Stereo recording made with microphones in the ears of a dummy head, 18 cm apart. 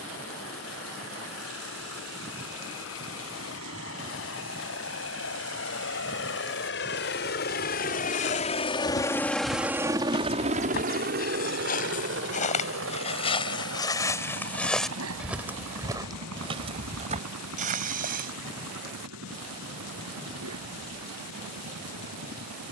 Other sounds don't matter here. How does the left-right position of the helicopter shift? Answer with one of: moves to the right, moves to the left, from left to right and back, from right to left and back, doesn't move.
moves to the right.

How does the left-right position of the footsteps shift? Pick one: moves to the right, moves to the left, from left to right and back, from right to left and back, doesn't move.
moves to the right.